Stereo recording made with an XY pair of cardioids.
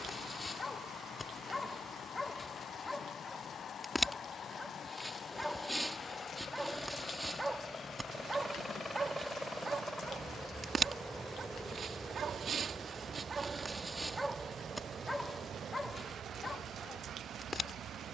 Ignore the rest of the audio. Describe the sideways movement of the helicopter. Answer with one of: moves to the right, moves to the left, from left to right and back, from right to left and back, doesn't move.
moves to the right.